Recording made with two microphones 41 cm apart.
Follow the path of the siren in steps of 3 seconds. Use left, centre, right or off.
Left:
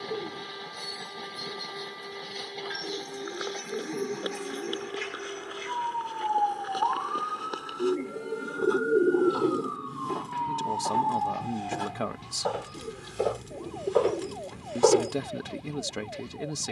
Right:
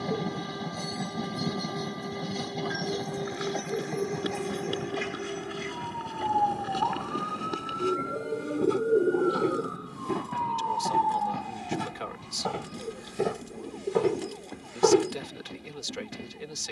right, right, right, left, left, left.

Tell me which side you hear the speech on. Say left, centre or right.
left.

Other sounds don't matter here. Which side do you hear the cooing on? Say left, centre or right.
left.